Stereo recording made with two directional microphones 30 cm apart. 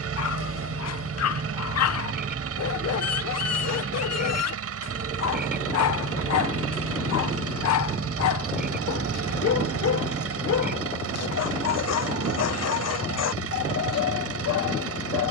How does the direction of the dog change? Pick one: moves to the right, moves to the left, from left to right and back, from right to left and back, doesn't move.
doesn't move.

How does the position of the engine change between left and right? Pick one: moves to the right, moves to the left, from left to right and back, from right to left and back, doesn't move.
doesn't move.